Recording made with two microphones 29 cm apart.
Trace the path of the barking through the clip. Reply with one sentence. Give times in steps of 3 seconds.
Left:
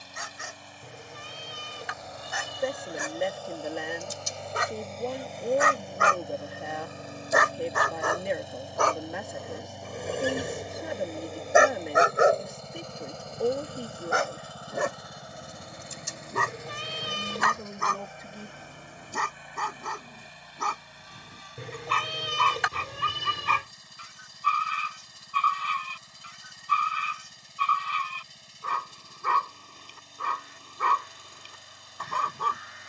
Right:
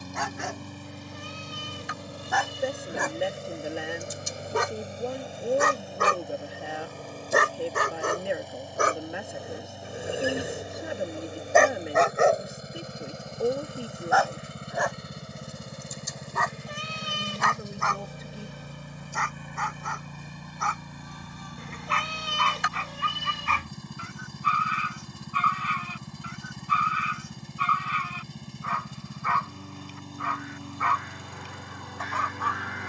You can hear the barking on the right from 0 s, in the centre from 9 s and on the left from 12 s.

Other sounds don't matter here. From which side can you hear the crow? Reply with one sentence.
In this clip you hear the crow on the right.